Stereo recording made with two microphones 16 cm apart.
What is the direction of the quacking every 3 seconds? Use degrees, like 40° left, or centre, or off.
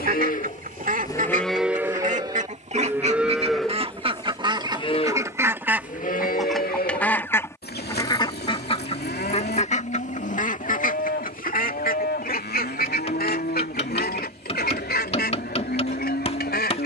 50° right, 30° right, 20° left, 50° left, 60° left, 70° left.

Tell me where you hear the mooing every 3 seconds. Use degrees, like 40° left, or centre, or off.
10° left, 20° left, 70° left, 80° left, 80° left, 80° left.